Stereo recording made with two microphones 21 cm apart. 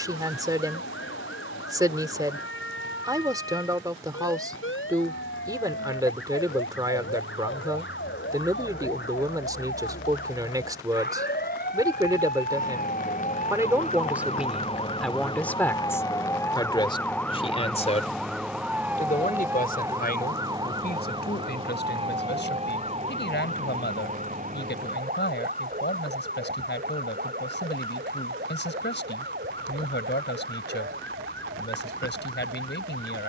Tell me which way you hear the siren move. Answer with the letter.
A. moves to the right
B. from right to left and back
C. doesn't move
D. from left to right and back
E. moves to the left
A.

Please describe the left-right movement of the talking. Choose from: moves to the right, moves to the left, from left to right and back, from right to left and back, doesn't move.
moves to the left.